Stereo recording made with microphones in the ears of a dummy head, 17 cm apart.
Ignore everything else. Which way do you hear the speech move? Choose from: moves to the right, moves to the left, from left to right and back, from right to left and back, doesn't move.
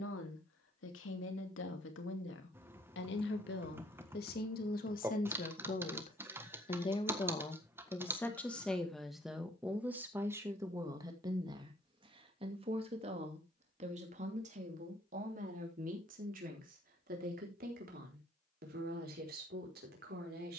moves to the right.